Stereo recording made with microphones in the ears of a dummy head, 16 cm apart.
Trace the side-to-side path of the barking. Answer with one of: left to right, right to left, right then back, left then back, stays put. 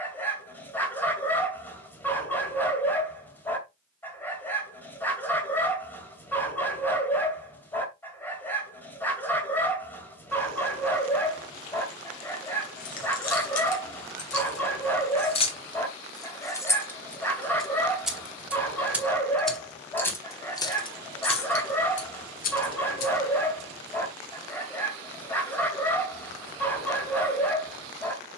stays put.